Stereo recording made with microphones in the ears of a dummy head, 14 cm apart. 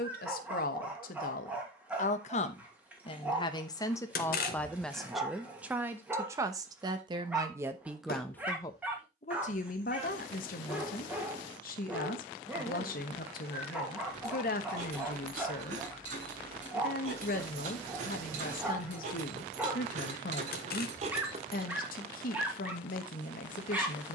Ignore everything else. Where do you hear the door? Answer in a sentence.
In this clip you hear the door on the left.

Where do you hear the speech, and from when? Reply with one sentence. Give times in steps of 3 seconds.
In this clip you hear the speech on the left from 0 s, in the centre from 3 s and on the left from 9 s.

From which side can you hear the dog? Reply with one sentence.
You can hear the dog in the centre.